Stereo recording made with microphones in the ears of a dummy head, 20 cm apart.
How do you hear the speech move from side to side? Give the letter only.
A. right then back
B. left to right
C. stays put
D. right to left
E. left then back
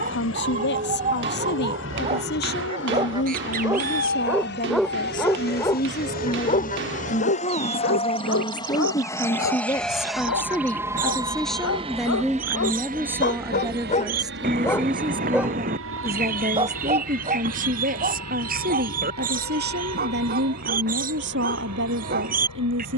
B.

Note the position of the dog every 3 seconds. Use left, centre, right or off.
right, centre, left, left, left, right, right, right.